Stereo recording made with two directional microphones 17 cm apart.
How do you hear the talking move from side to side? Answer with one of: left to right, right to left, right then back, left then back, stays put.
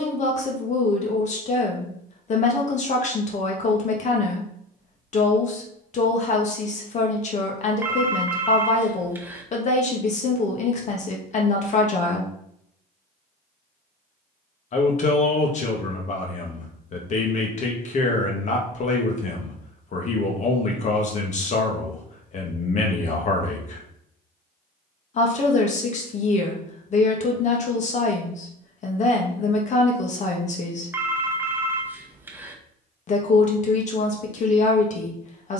stays put.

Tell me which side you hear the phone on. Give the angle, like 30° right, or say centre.
10° right.